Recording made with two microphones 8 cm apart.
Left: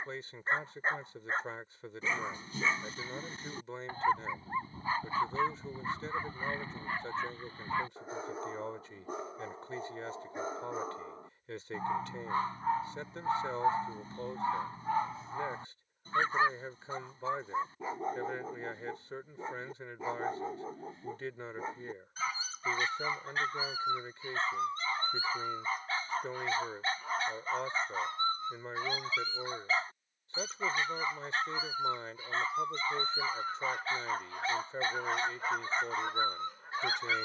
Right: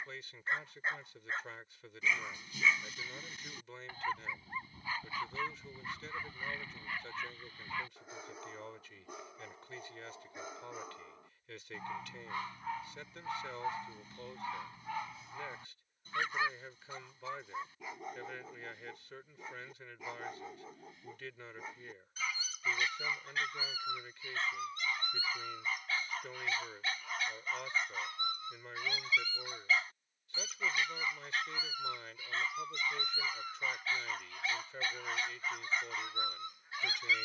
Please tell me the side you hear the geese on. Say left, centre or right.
left.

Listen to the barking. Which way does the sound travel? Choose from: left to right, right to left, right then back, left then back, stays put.
stays put.